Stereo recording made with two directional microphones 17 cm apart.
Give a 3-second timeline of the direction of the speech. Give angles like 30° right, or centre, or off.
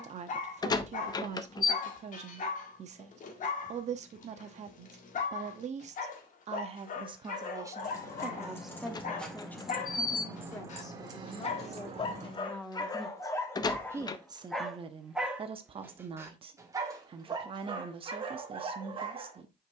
40° right, 40° right, 20° right, 20° left, 10° right, 30° right, 30° right.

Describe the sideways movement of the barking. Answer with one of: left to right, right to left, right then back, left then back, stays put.
left to right.